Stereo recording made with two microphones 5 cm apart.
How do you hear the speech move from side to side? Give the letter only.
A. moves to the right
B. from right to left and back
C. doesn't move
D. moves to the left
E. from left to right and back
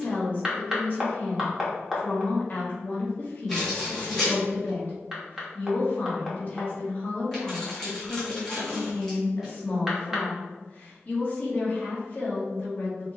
C.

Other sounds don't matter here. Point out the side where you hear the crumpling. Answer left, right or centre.
centre.